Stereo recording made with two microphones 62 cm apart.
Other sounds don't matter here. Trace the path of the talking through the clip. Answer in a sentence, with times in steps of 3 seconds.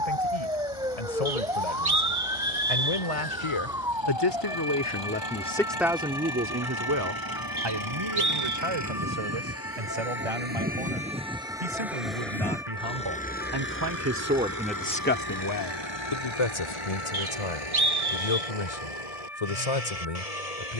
In this clip you hear the talking on the left from 0 s, on the right from 6 s and on the left from 15 s.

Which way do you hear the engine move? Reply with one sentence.
You can hear the engine move to the left.